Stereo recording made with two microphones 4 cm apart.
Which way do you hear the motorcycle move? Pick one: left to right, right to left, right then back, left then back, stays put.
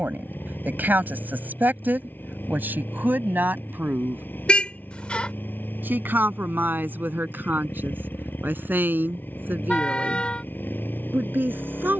stays put.